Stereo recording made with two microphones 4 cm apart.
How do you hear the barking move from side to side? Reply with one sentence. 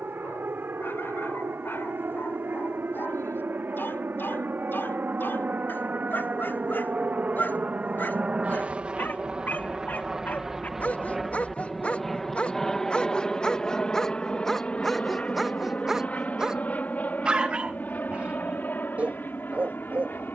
You can hear the barking move from left to right.